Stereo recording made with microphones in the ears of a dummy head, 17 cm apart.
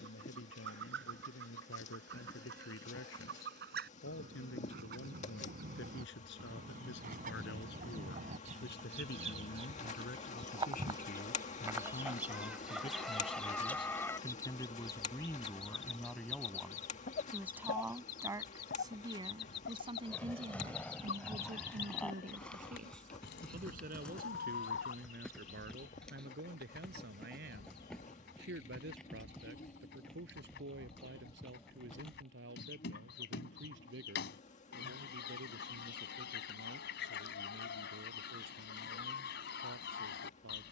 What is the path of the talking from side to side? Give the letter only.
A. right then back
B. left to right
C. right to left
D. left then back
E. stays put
B.